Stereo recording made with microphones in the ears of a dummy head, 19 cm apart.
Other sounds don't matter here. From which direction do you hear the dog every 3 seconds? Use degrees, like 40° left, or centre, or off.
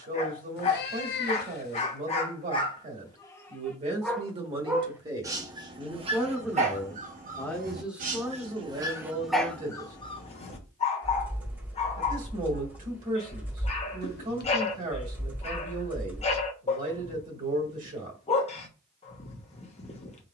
30° left, 10° right, 30° right, 20° left, 30° left, 30° left, 30° left.